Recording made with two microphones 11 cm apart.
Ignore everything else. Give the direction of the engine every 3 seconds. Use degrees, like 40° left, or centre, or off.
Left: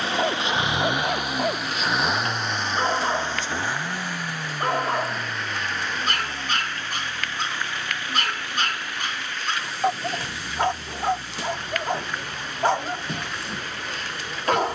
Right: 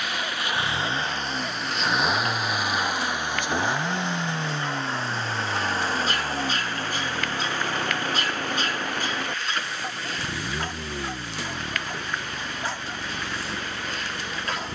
10° left, 20° right, 40° right, 50° right, 50° right.